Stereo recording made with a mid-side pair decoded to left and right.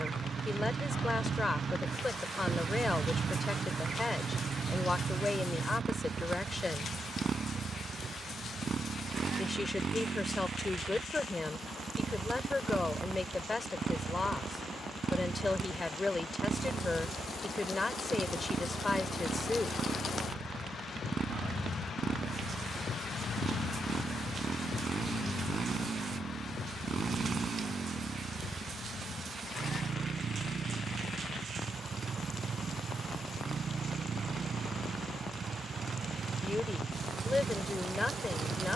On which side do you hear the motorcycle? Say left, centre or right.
right.